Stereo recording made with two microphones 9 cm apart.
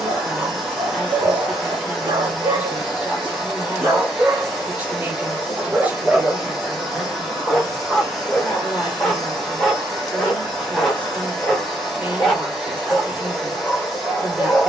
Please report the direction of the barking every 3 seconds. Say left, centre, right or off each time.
right, right, centre, centre, centre.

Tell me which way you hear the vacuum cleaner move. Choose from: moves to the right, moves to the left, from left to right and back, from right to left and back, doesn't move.
doesn't move.